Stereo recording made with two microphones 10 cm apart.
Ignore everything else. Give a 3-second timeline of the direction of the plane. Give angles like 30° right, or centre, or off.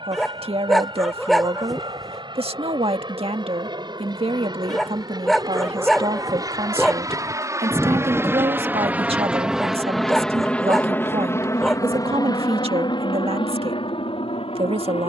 60° right, 50° right, 30° right, 10° left, 50° left.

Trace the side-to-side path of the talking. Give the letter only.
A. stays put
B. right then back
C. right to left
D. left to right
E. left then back
A.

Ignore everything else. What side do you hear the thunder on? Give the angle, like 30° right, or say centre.
centre.